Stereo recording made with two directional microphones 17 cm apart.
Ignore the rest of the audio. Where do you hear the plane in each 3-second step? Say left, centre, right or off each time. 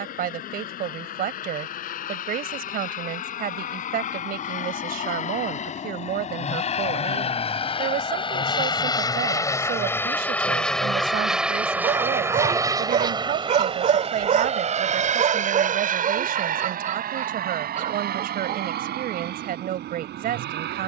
left, left, left, centre, right, right, right.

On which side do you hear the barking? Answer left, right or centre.
right.